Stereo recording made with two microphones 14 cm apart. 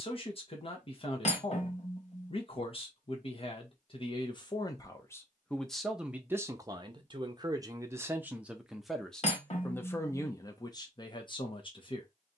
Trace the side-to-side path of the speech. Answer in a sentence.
In this clip you hear the speech move from left to right and back again.